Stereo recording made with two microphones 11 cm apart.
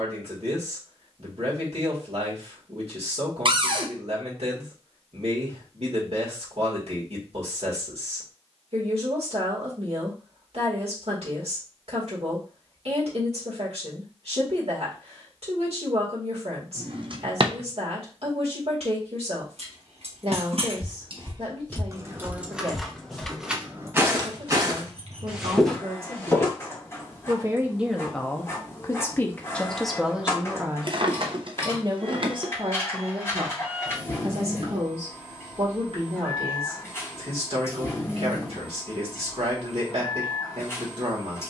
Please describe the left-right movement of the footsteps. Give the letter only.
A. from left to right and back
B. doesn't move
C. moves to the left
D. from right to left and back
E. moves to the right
A.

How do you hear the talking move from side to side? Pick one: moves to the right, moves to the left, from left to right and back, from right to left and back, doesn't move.
from right to left and back.